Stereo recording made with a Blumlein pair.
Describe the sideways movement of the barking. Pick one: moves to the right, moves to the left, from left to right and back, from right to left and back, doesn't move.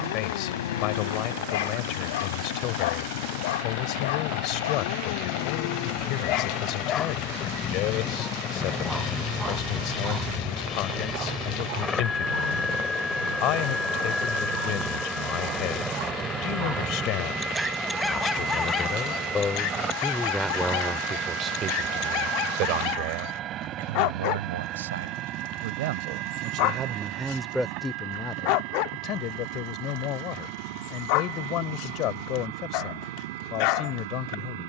from left to right and back.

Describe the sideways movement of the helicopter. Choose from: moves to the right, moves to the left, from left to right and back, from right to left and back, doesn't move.
moves to the right.